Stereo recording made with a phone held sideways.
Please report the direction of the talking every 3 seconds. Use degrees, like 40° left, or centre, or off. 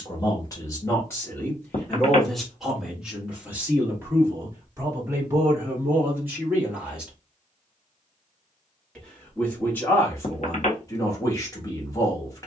10° left, 20° right, 10° right, 20° left.